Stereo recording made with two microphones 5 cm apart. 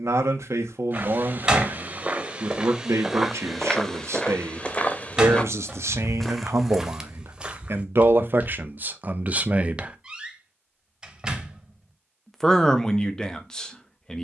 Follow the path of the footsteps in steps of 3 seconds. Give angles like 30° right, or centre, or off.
30° right, 10° left, 10° right, off, off.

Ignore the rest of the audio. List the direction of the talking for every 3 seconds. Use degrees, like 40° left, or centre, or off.
80° right, 80° right, 60° right, 30° right, 10° left.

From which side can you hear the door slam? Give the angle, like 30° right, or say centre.
20° right.